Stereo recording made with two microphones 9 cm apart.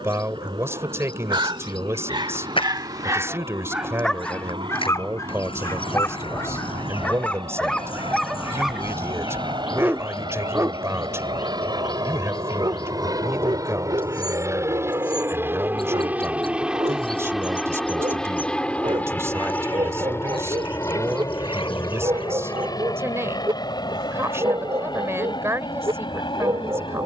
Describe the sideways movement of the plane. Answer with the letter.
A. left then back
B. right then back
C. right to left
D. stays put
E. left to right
C.